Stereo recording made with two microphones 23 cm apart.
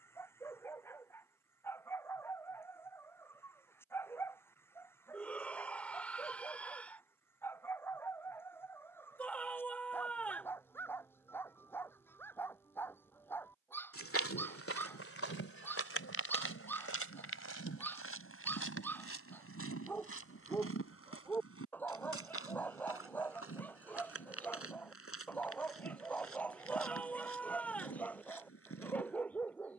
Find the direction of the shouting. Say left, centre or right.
centre.